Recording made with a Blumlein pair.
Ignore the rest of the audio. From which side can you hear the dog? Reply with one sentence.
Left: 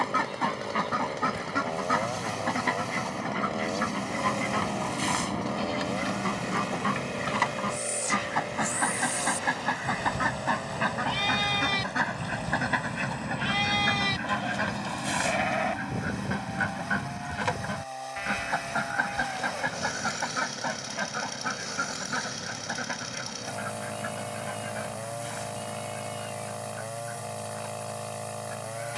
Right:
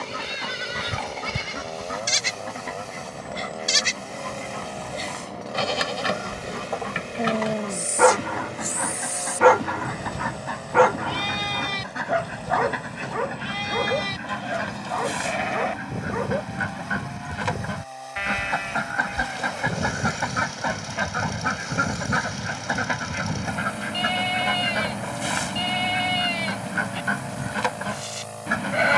You can hear the dog on the right.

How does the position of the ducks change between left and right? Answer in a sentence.
You can hear the ducks move from left to right.